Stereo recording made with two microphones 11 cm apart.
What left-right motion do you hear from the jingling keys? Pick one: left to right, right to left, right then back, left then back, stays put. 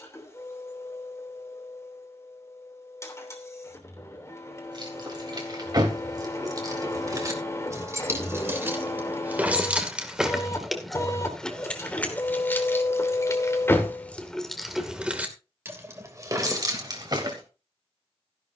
left then back.